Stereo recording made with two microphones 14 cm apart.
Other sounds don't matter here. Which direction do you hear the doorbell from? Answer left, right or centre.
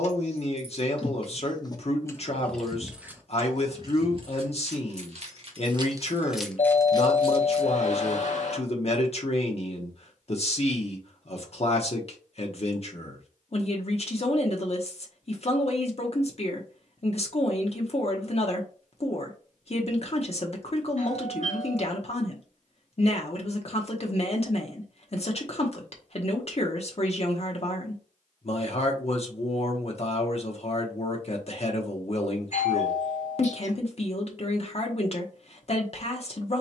left.